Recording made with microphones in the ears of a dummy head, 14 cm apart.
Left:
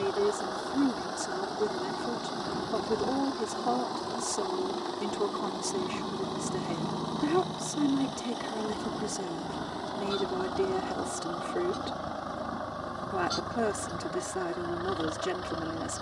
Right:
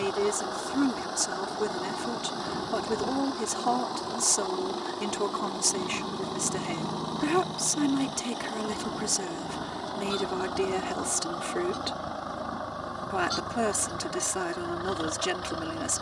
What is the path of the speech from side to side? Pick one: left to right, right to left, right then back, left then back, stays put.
stays put.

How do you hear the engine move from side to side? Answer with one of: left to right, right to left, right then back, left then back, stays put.
stays put.